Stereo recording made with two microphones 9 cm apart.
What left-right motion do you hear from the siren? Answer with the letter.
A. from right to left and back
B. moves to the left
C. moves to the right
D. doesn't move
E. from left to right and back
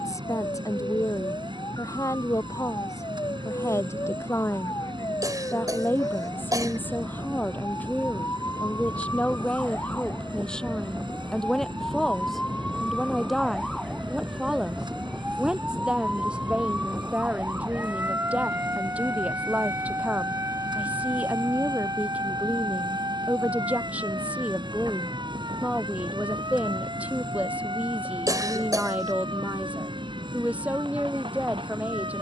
C.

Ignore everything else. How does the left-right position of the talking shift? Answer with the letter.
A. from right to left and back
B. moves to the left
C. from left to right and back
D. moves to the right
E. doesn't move
D.